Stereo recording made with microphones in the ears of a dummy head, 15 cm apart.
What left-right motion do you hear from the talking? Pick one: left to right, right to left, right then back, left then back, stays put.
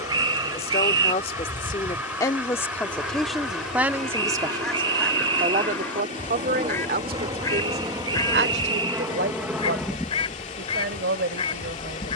left to right.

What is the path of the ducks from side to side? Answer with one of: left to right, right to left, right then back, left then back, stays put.
right to left.